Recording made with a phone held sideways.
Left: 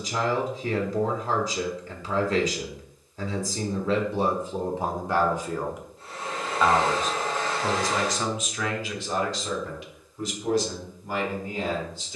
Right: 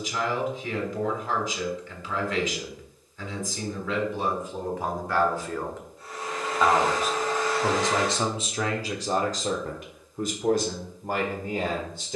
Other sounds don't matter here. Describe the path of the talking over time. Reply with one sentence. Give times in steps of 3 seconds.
In this clip you hear the talking on the left from 0 s and on the right from 6 s.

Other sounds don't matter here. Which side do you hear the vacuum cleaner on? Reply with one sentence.
In this clip you hear the vacuum cleaner on the left.